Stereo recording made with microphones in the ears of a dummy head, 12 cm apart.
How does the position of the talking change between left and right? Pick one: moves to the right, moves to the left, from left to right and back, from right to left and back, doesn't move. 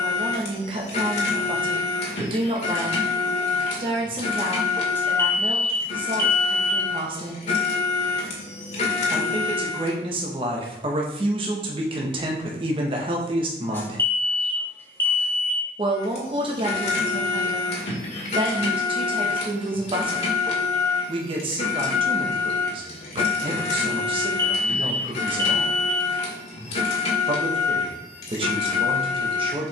doesn't move.